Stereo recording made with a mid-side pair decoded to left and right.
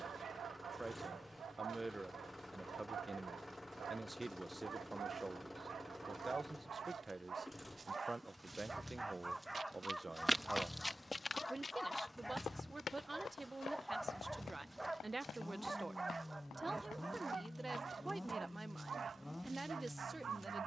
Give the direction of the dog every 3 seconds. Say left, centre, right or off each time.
right, right, right, centre, centre, right, right.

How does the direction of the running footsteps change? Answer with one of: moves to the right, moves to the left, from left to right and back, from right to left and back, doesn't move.
moves to the left.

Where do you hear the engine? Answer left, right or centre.
centre.